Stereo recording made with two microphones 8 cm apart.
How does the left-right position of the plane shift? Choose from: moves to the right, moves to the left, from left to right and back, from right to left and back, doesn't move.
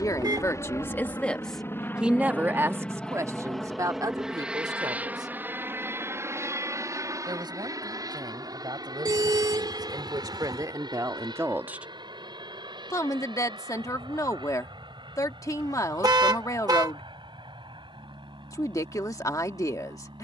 moves to the right.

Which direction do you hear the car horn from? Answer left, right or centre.
right.